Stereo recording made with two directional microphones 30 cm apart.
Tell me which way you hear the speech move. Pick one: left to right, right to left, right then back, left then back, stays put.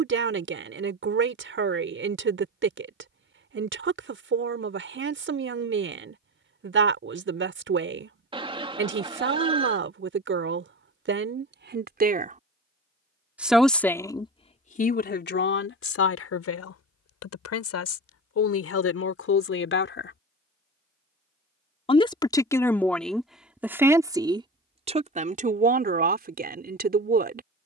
left then back.